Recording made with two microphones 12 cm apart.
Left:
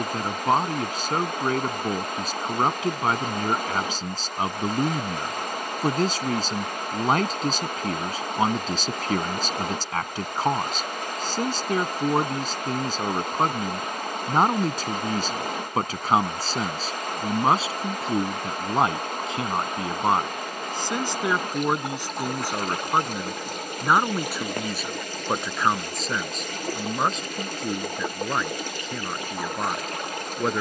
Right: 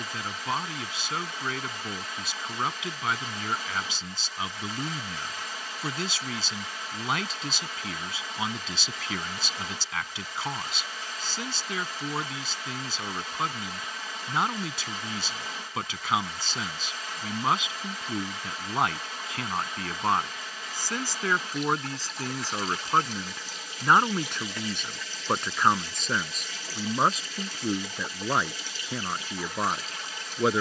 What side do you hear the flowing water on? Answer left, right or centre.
left.